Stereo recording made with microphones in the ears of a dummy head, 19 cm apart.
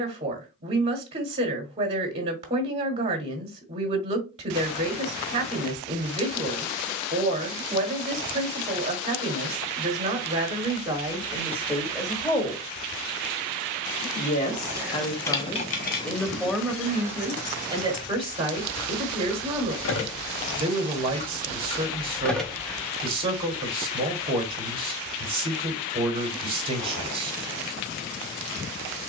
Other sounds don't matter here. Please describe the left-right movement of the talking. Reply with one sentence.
In this clip you hear the talking go left and come back.